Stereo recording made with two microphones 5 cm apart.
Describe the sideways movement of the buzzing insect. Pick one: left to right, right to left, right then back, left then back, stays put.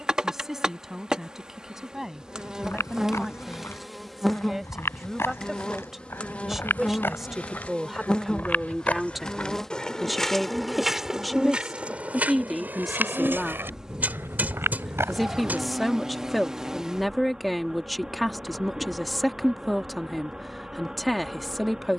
left then back.